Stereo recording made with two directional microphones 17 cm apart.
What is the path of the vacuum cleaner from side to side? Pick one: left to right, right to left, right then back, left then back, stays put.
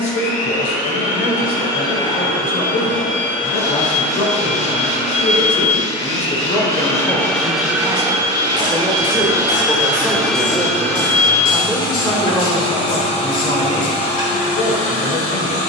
right then back.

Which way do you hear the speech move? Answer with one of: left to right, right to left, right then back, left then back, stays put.
right then back.